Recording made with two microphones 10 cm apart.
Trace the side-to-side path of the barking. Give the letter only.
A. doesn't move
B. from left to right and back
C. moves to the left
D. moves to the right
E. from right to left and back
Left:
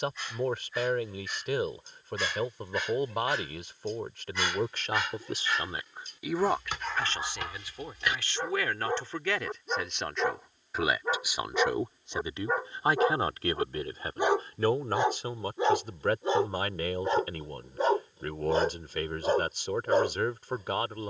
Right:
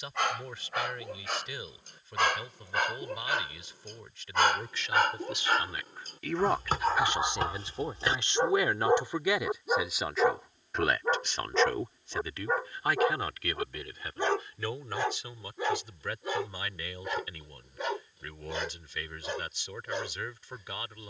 C.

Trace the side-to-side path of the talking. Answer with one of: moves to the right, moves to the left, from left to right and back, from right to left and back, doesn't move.
from left to right and back.